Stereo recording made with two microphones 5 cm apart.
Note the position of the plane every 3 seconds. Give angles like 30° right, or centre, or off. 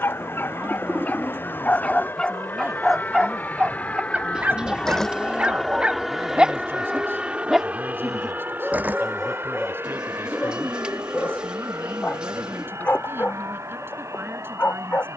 50° left, 20° left, 20° right, 50° right, 70° right.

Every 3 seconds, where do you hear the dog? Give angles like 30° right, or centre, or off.
30° left, 30° right, centre, 20° left, 40° left.